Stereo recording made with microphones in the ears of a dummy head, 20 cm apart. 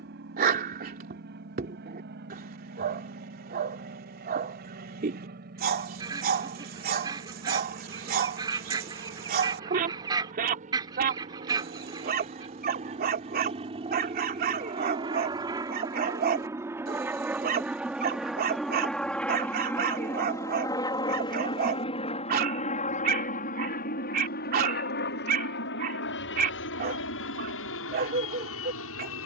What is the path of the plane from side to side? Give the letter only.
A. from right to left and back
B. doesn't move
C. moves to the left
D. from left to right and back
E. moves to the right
C.